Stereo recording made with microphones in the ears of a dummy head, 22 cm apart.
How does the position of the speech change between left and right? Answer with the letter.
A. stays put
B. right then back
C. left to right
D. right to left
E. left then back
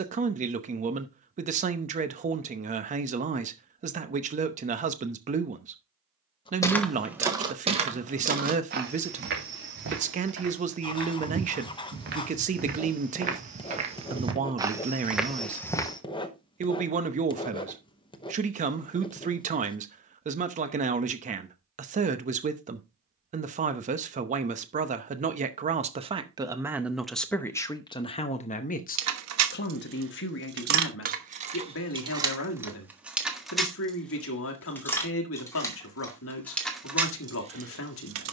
D.